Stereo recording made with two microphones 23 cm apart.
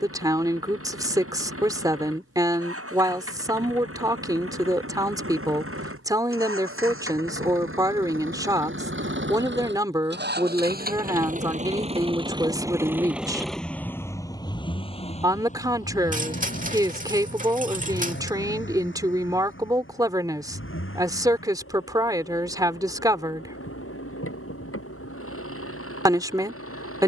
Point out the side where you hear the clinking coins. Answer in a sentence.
You can hear the clinking coins on the right.